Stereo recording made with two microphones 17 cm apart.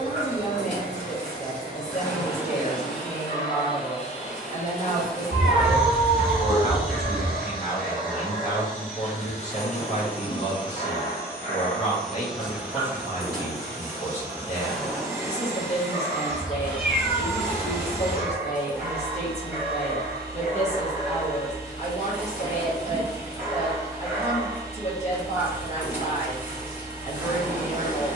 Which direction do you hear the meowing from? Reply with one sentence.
In this clip you hear the meowing in the centre.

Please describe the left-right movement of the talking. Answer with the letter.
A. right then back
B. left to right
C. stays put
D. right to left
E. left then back
C.